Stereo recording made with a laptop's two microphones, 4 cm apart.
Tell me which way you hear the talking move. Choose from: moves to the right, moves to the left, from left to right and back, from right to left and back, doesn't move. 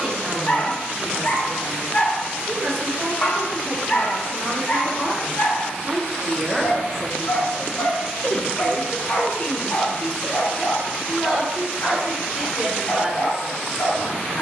from right to left and back.